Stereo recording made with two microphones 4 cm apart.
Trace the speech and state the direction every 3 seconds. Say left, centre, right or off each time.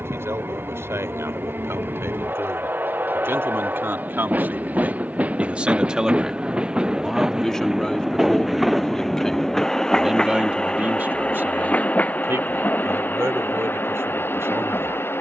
right, right, centre, right, right.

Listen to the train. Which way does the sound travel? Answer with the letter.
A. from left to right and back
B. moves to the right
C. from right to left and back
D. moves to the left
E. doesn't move
D.